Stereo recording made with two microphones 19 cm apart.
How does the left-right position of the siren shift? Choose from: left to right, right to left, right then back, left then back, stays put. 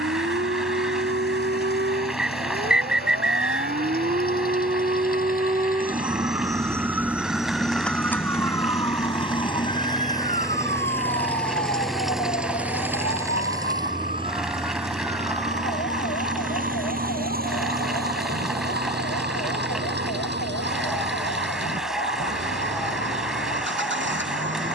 right to left.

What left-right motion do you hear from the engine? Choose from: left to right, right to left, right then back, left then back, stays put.
left to right.